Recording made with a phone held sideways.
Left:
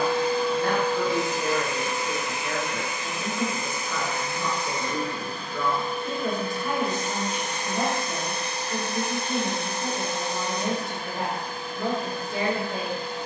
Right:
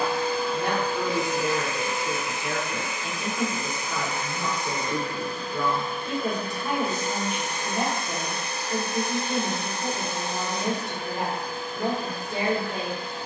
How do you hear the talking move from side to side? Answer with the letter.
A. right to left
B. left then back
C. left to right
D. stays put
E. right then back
D.